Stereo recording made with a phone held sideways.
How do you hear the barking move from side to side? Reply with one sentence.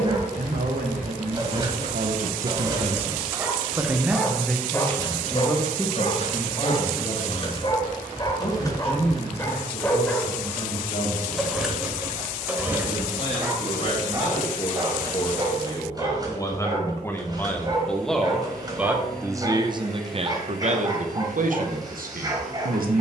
In this clip you hear the barking go left and come back.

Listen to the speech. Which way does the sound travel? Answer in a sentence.
You can hear the speech move from right to left and back again.